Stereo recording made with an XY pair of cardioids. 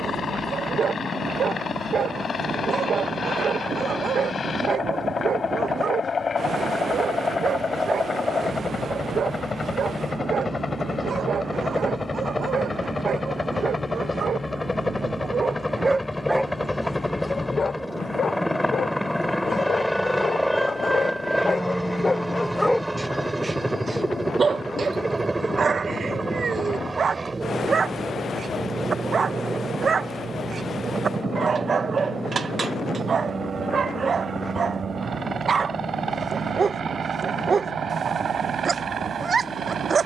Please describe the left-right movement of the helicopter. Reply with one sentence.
You can hear the helicopter move from left to right.